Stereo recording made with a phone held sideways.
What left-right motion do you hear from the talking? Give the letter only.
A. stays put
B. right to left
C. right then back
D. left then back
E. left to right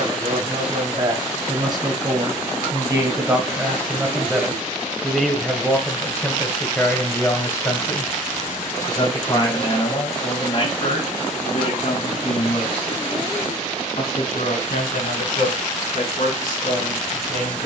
B.